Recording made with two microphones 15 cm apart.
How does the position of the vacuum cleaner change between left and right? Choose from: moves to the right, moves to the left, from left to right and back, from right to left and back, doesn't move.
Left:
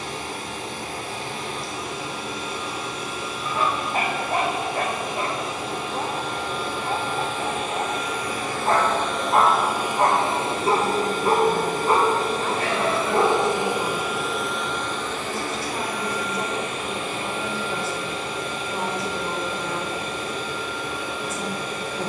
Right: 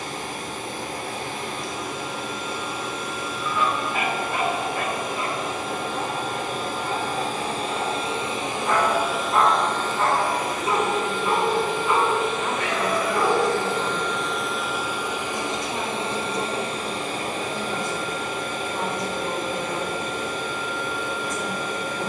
from right to left and back.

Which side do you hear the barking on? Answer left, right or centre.
left.